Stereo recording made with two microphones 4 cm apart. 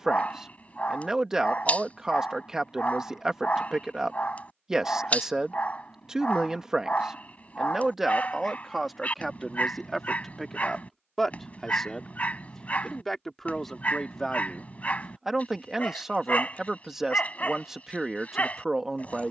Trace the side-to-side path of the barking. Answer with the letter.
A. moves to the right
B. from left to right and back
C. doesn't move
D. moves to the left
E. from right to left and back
C.